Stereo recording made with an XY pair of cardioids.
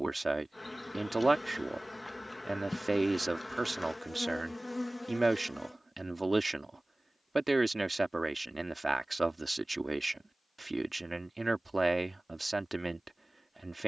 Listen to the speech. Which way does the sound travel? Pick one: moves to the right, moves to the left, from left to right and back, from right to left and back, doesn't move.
doesn't move.